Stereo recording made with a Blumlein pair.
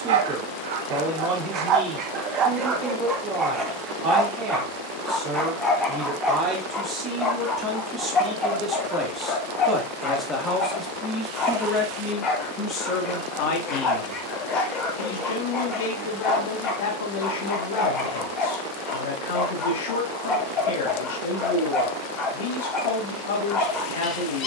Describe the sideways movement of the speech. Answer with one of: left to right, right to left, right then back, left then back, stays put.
right to left.